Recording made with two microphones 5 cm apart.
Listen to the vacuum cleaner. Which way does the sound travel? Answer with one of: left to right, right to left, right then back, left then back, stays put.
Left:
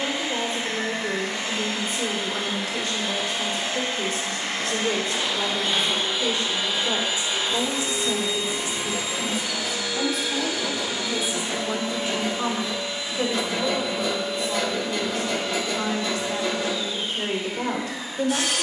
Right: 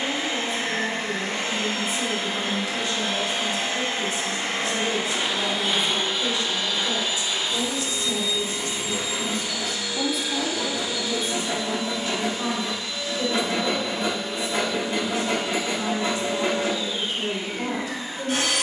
left then back.